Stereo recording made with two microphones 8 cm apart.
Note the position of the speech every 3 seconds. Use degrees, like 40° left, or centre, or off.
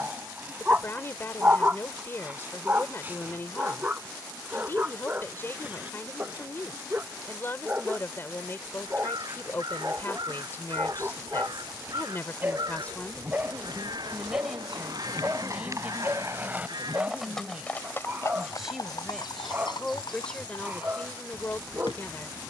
30° left, 30° left, 30° left, 30° left, 10° left, 20° right, 10° left, 30° left.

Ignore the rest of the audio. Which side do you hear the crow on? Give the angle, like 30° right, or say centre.
60° right.